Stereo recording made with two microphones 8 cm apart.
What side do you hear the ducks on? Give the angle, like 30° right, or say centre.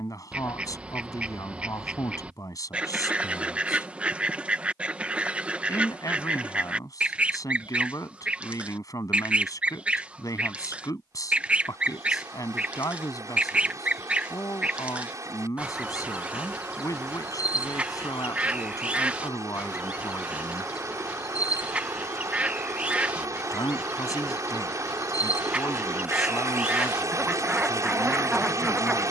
20° right.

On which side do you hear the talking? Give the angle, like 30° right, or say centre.
50° left.